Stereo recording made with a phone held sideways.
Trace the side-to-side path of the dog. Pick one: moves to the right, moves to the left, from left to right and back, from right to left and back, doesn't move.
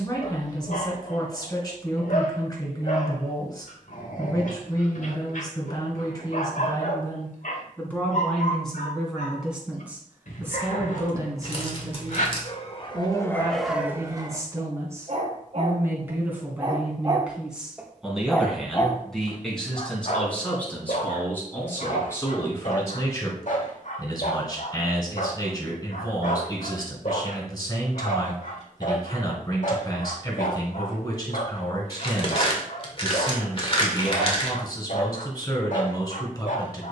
from left to right and back.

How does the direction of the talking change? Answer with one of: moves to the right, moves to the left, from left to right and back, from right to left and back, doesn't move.
from left to right and back.